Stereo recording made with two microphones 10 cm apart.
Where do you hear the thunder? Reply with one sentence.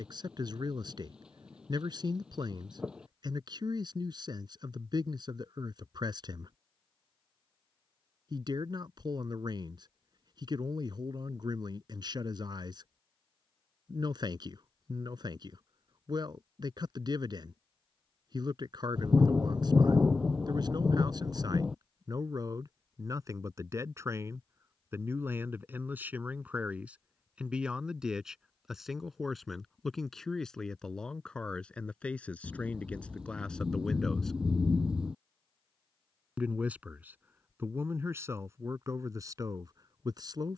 In this clip you hear the thunder in the centre.